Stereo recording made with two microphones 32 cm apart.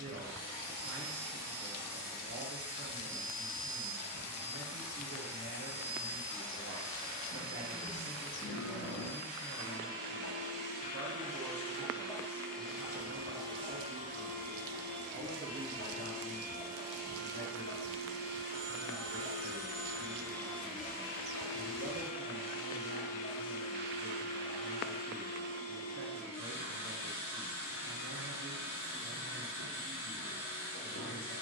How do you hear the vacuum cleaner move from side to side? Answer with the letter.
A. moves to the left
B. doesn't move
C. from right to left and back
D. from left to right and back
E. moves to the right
D.